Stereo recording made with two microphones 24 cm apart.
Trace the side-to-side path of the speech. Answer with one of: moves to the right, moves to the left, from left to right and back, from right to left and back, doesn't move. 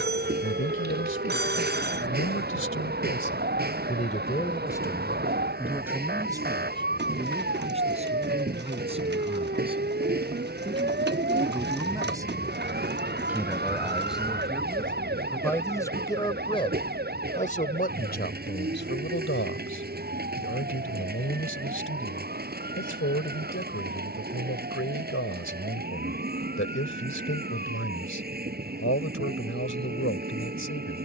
from left to right and back.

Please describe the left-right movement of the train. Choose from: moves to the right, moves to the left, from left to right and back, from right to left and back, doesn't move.
doesn't move.